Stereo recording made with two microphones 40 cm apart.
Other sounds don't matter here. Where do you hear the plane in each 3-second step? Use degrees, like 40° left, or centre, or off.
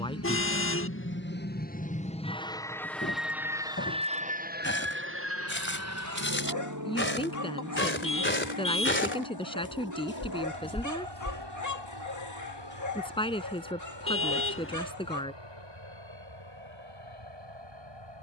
20° left, 20° right, 50° right, 60° right, 70° right, 80° right.